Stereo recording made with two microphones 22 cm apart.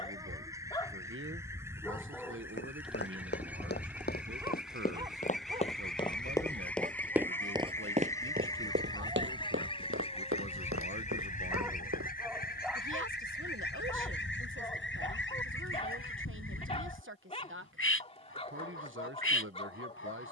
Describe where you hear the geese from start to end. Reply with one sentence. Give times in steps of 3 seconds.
In this clip you hear the geese in the centre from 0 s and on the left from 9 s.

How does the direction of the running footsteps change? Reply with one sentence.
You can hear the running footsteps move to the right.